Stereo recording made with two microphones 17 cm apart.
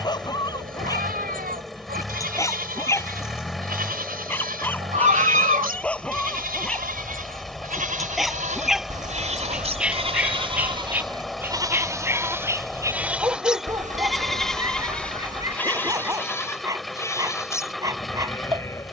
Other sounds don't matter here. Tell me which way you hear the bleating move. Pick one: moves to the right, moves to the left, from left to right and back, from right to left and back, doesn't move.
moves to the left.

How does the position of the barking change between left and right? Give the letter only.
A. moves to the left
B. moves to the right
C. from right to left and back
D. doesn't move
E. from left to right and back
B.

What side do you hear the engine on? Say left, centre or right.
centre.